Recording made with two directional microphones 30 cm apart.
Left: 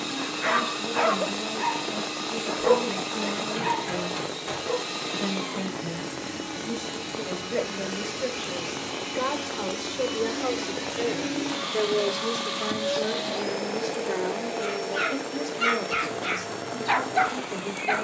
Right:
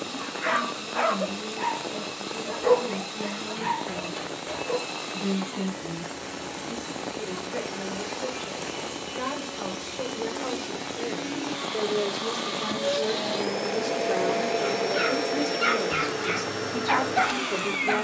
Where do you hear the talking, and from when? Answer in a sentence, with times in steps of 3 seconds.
In this clip you hear the talking on the left from 0 s, in the centre from 12 s and on the right from 15 s.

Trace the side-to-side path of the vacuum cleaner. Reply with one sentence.
In this clip you hear the vacuum cleaner move from left to right.